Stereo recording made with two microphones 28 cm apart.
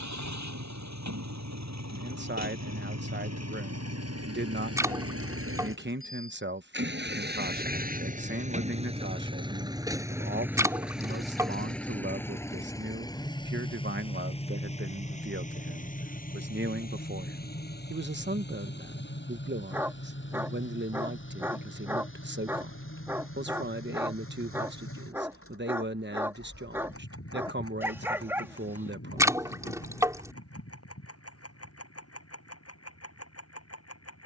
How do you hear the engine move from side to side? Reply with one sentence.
You can hear the engine travel towards the left.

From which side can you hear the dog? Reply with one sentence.
In this clip you hear the dog in the centre.